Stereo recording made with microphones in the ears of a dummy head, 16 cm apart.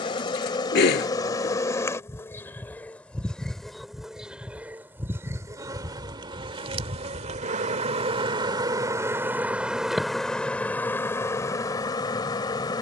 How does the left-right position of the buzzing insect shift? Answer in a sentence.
You can hear the buzzing insect go right and come back.